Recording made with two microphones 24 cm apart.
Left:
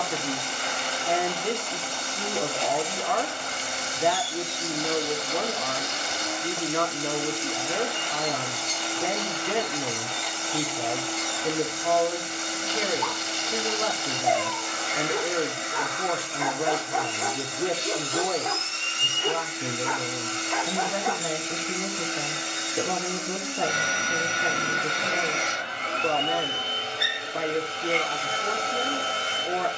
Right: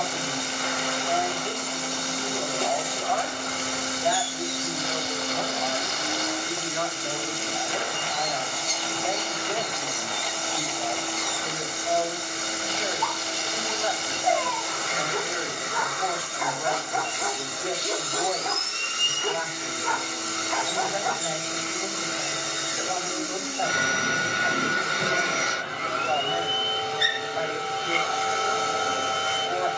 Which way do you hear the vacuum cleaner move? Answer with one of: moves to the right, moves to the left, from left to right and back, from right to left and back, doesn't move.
doesn't move.